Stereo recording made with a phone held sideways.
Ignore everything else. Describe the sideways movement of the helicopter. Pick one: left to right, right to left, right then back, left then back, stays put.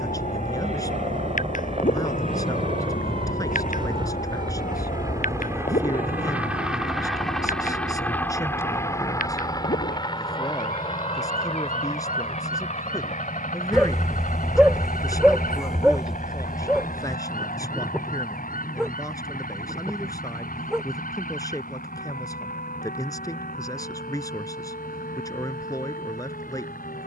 right to left.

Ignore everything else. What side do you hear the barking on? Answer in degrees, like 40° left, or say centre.
centre.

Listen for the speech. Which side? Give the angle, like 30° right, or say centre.
30° left.